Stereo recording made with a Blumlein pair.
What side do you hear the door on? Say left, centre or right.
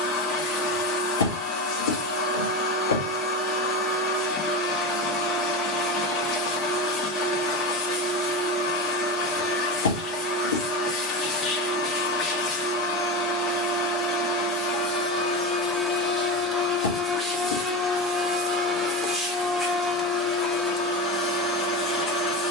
left.